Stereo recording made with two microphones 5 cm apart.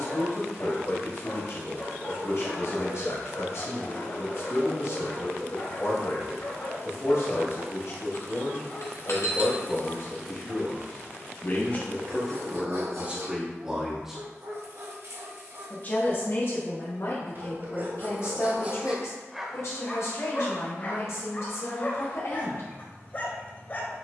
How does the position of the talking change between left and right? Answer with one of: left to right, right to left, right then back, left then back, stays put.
right then back.